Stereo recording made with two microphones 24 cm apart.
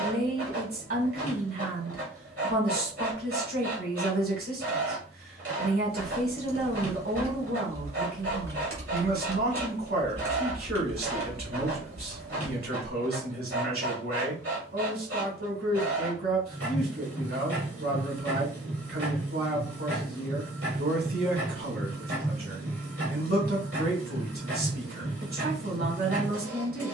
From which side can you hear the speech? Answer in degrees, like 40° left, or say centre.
60° right.